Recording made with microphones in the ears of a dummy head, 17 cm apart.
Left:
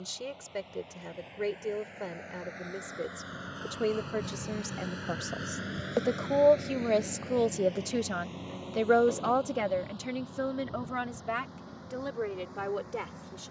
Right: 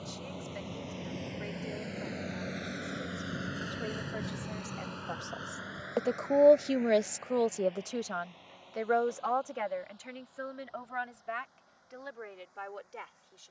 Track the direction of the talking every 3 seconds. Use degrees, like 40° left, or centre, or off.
70° left, 50° left, 10° left, 60° left, 70° left.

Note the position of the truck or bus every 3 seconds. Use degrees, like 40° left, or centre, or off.
50° right, centre, 60° left, 70° left, 80° left.